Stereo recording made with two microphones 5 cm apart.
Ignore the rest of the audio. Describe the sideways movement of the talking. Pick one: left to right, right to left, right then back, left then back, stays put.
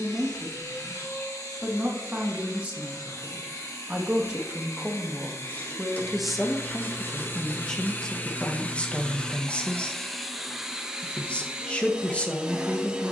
right to left.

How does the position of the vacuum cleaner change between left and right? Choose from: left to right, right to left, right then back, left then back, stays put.
left to right.